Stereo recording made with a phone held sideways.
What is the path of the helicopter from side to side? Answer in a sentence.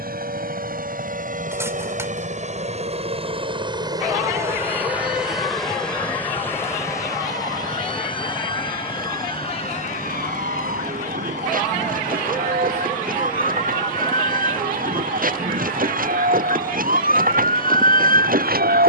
In this clip you hear the helicopter go from the right side to the left.